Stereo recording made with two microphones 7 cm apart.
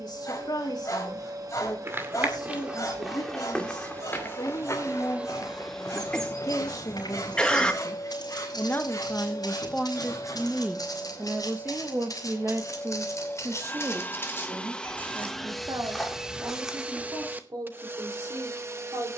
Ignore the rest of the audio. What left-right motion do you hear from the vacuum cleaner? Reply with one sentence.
In this clip you hear the vacuum cleaner go left and come back.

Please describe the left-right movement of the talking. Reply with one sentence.
In this clip you hear the talking go from the left side to the right.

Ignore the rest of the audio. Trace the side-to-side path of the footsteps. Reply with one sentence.
You can hear the footsteps move from right to left and back again.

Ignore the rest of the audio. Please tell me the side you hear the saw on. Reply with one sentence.
In this clip you hear the saw on the left.